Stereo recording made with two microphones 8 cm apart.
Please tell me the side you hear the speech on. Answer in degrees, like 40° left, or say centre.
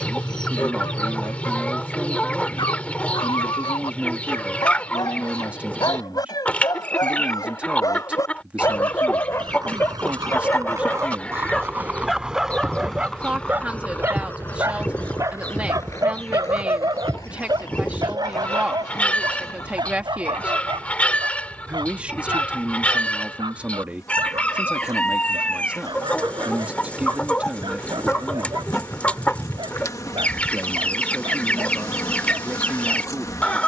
20° right.